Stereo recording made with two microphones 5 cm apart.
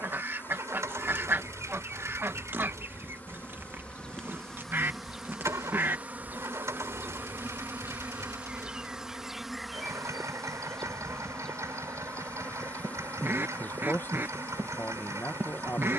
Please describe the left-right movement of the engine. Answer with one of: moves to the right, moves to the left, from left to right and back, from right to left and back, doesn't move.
doesn't move.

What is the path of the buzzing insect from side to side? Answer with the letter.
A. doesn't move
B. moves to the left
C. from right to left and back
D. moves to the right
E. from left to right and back
E.